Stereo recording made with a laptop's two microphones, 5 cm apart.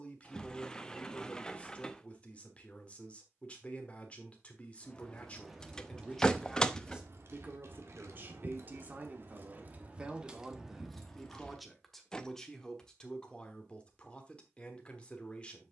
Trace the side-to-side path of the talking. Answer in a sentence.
In this clip you hear the talking go right and come back.